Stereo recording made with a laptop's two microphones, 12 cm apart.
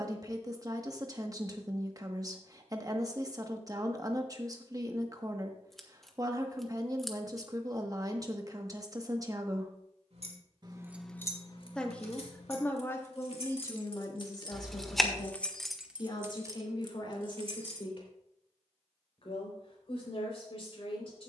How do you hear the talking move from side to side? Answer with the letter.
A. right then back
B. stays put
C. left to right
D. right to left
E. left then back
D.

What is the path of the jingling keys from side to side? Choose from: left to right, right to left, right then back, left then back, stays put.
left then back.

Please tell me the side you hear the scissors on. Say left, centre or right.
centre.